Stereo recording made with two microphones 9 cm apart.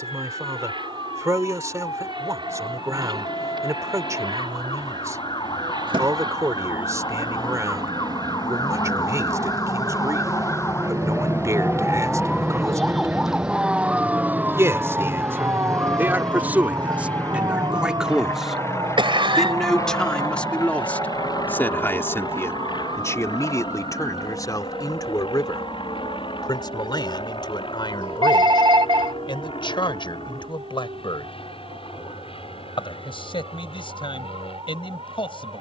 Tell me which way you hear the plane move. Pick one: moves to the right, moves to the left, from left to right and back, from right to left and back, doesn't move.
moves to the left.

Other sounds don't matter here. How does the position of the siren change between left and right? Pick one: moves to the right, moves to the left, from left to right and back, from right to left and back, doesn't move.
moves to the right.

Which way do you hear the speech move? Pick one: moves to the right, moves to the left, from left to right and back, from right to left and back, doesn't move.
moves to the left.